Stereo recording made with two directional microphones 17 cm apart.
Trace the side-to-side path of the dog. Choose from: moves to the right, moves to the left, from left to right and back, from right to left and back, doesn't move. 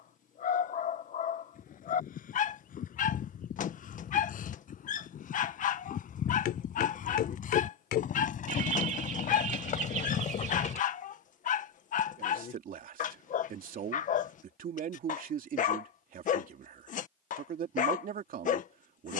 doesn't move.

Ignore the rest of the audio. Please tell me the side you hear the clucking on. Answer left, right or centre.
right.